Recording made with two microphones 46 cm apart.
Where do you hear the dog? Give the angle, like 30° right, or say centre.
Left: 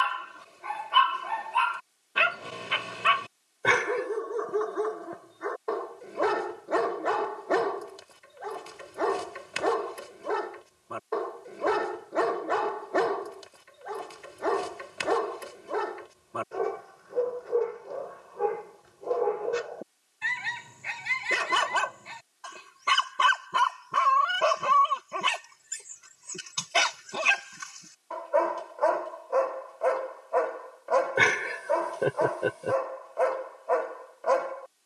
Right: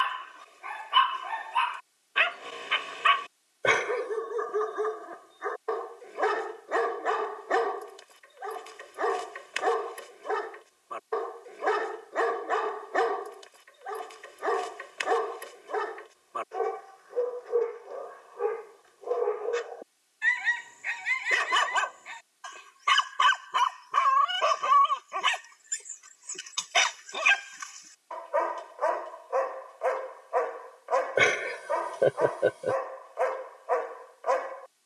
60° left.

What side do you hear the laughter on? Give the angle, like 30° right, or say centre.
10° left.